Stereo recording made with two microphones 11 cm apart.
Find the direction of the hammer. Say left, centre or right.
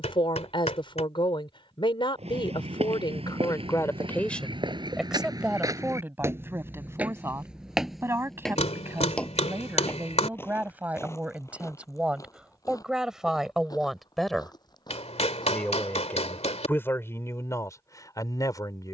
left.